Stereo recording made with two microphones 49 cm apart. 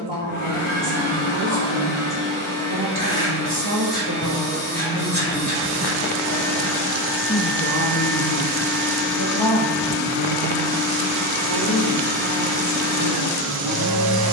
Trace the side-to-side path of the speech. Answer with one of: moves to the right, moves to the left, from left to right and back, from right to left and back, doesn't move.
moves to the left.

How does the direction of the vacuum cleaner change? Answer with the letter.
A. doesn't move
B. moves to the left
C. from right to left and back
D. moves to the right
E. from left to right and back
A.